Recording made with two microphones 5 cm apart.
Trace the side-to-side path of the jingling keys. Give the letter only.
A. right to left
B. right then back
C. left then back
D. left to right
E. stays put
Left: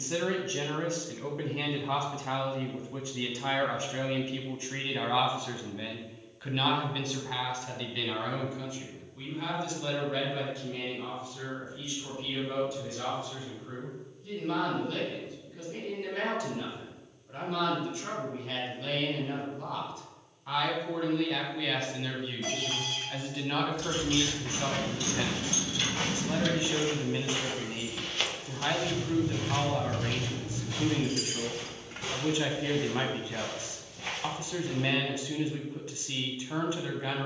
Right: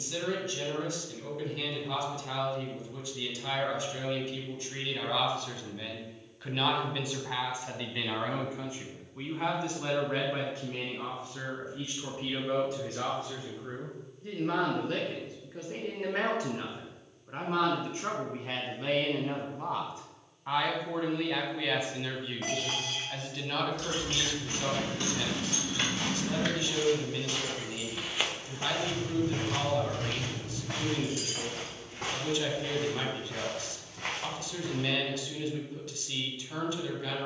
A.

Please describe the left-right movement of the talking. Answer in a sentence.
You can hear the talking move from left to right and back again.